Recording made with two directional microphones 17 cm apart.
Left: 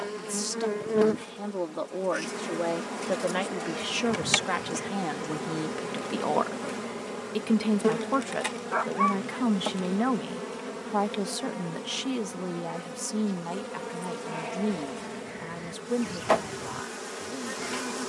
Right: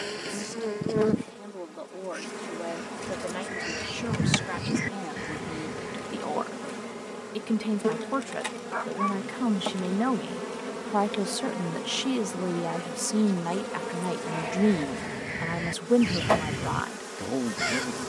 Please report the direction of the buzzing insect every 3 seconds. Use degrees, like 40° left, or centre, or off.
20° left, 20° left, 20° left, 10° right, 20° right, centre.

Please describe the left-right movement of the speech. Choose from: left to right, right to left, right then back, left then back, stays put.
left to right.